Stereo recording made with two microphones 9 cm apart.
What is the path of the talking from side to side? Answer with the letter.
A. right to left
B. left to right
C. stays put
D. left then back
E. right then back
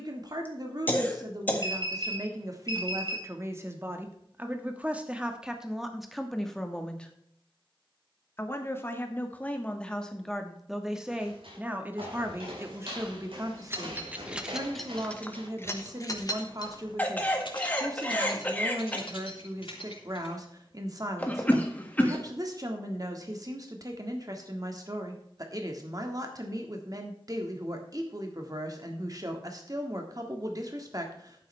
D.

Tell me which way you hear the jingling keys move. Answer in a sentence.
In this clip you hear the jingling keys travel towards the left.